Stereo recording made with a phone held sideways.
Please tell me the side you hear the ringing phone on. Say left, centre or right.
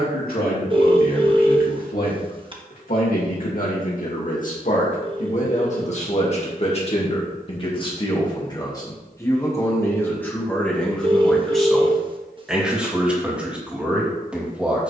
right.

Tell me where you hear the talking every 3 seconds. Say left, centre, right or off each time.
left, left, left, centre, centre.